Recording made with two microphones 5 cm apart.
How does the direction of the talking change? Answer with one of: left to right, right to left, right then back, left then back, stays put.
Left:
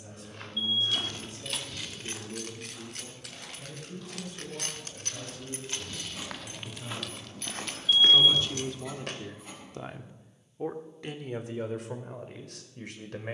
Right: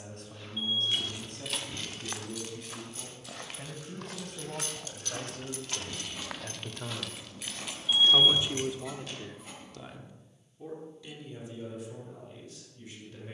right to left.